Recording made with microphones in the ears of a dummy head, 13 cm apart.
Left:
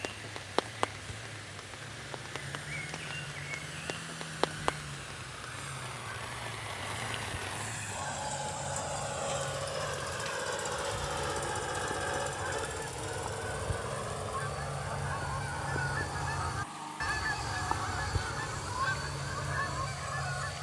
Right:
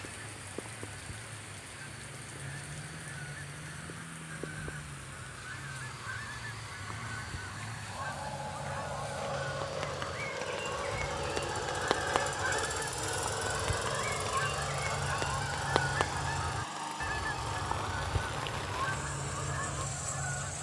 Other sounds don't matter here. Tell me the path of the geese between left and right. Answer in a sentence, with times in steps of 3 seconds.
In this clip you hear the geese on the right from 0 s, in the centre from 15 s and on the left from 18 s.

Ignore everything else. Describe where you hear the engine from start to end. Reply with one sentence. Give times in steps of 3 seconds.
You can hear the engine on the left from 0 s and on the right from 12 s.